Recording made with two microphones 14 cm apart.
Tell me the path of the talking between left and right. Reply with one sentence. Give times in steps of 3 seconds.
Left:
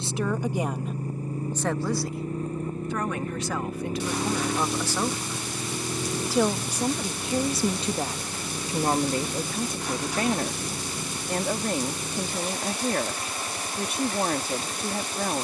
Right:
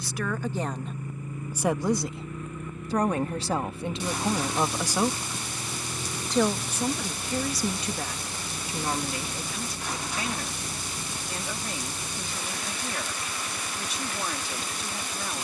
You can hear the talking in the centre from 0 s, on the right from 3 s and on the left from 6 s.